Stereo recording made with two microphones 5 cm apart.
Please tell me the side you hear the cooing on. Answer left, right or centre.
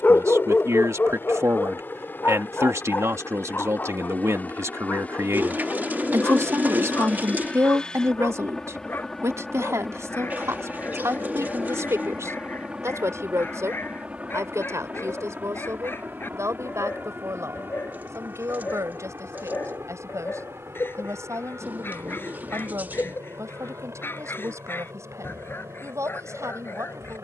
right.